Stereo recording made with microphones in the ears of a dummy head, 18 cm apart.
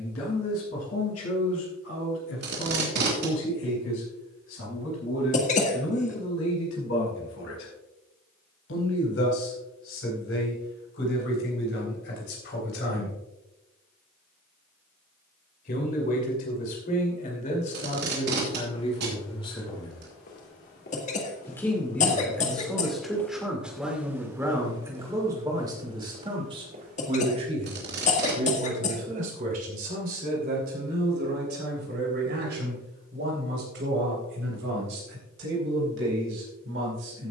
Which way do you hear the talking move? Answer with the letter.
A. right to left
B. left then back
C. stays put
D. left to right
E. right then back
D.